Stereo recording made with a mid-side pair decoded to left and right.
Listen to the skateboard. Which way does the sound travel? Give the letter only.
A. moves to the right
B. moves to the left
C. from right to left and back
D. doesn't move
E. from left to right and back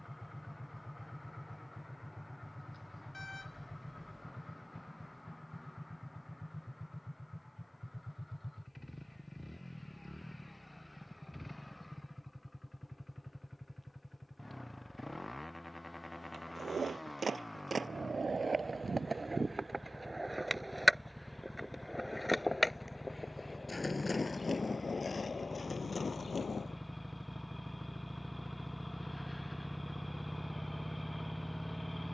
B.